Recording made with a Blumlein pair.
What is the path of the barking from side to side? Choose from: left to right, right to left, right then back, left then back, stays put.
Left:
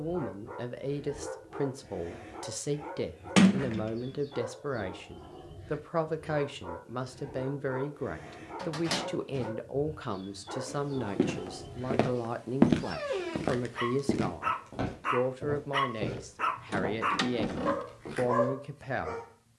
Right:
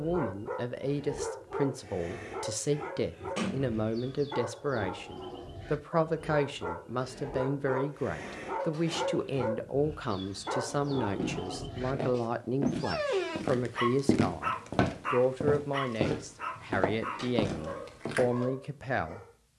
right to left.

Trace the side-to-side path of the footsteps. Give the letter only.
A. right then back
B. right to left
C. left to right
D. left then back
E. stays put
C.